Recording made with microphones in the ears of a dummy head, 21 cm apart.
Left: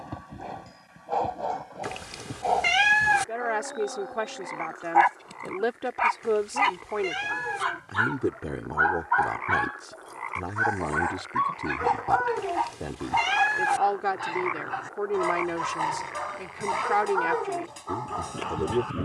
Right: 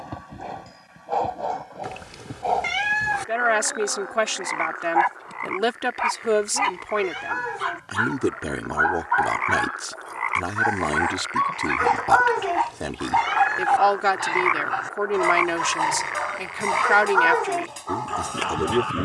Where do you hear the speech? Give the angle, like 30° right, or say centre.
70° right.